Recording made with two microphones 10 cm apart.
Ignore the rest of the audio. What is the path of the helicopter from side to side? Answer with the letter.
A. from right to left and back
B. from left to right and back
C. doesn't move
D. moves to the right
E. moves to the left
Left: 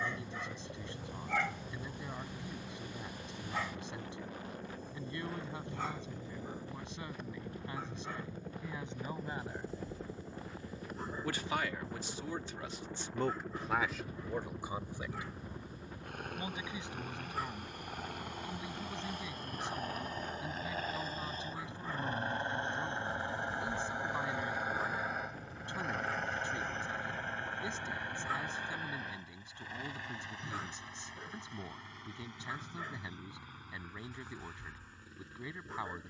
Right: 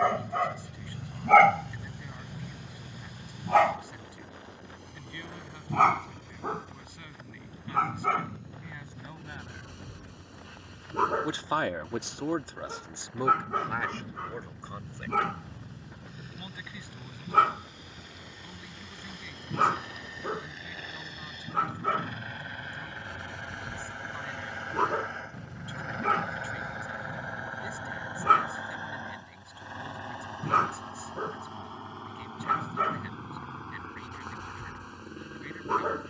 D.